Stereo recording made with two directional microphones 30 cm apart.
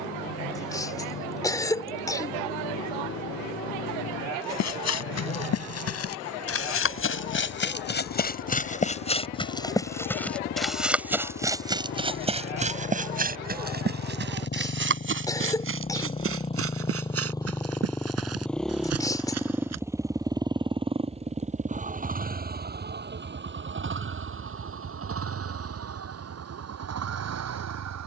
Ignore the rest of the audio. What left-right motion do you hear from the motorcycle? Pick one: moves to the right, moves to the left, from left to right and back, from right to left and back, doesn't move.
moves to the right.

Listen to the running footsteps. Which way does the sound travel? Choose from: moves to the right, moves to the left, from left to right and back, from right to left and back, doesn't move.
moves to the right.